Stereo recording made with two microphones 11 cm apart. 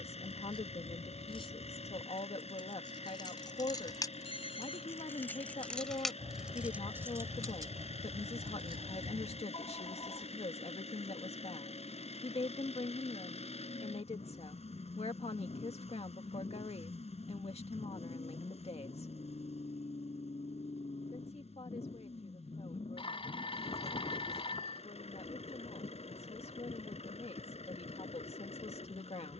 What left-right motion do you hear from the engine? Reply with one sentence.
In this clip you hear the engine stay in one place.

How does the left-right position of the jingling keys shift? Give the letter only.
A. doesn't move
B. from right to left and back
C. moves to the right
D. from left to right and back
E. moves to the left
C.